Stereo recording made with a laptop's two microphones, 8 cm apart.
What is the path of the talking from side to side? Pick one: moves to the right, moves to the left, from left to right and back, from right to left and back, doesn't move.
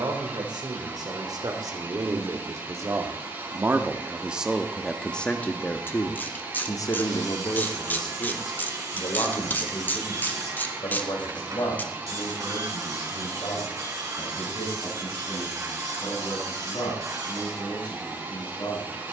moves to the left.